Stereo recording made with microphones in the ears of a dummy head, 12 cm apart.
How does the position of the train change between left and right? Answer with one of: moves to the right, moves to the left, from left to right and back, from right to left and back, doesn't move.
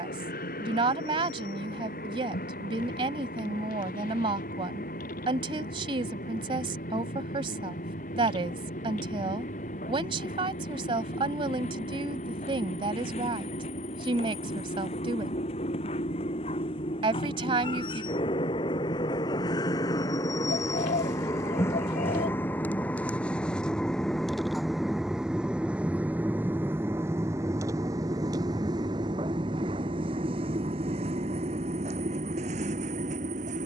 moves to the right.